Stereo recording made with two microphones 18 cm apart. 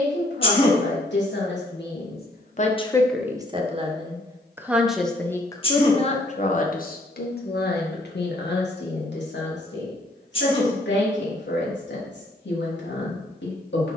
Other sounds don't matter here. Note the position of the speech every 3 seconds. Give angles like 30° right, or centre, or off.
70° left, 10° right, 60° left, 80° left, 80° left.